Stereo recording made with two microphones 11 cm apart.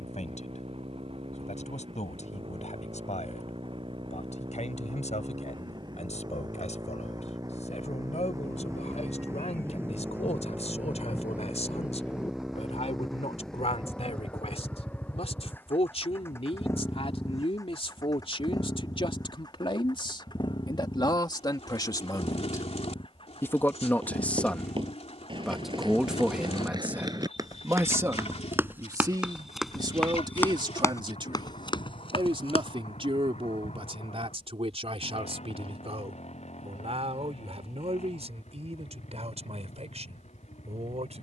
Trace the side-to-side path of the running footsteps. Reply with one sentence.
You can hear the running footsteps go from the right side to the left.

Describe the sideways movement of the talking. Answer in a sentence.
In this clip you hear the talking go from the left side to the right.